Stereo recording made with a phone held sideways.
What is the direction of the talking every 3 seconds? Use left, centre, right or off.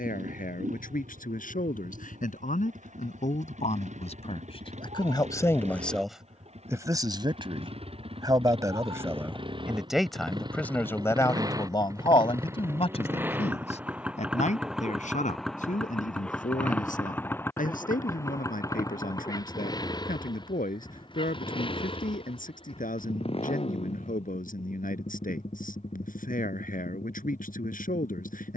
left, left, right, centre, left, left, left, left, left, left.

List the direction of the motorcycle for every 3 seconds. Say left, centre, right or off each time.
right, right, right, right, centre, centre, left, left, left, left.